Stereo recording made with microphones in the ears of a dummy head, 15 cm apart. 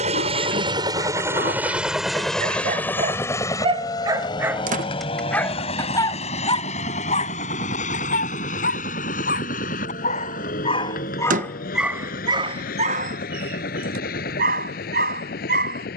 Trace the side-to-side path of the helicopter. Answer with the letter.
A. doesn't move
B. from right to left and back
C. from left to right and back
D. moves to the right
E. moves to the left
E.